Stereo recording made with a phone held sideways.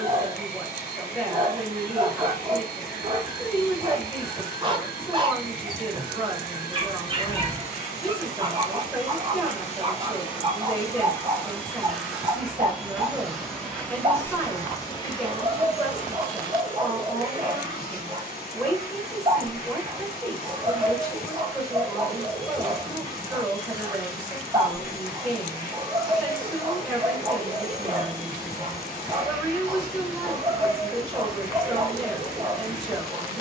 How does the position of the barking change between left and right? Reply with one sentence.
You can hear the barking stay put.